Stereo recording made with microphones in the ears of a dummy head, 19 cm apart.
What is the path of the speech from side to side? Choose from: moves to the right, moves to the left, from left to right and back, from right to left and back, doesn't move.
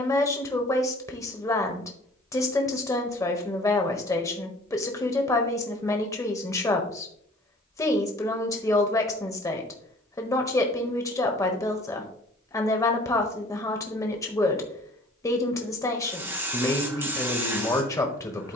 doesn't move.